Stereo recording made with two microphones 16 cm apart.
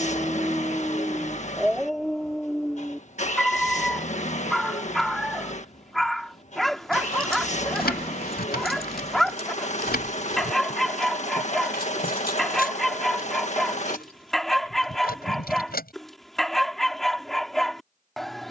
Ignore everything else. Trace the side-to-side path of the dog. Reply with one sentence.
You can hear the dog stay in one place.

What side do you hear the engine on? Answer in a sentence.
You can hear the engine on the left.